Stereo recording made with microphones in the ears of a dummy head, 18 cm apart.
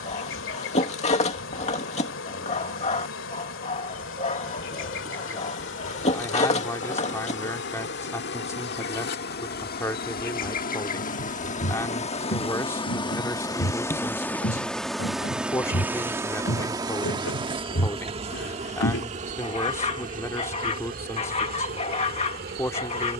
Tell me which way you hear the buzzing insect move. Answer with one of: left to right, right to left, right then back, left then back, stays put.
left to right.